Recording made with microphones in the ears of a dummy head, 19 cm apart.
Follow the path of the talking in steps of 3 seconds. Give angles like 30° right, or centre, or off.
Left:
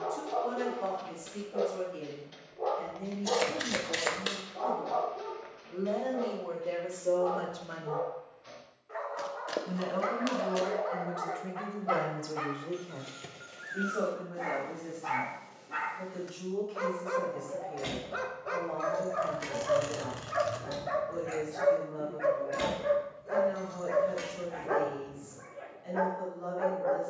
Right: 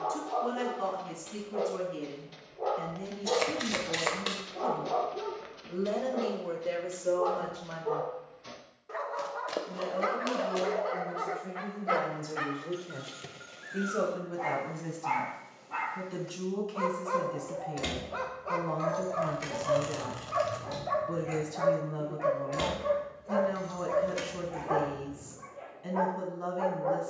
70° right, 60° right, 10° right, 60° left, 30° right, 60° right, 60° right, 60° right, 60° right.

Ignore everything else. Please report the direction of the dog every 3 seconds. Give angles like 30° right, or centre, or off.
20° left, 30° right, 60° right, 40° right, centre, 20° left, 20° left, 20° left, 20° left.